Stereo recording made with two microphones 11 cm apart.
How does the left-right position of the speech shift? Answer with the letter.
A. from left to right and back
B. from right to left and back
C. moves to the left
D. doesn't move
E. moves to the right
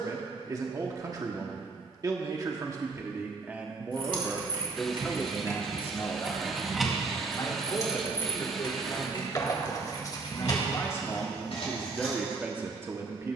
B.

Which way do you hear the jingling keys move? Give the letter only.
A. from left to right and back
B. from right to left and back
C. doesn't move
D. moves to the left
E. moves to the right
D.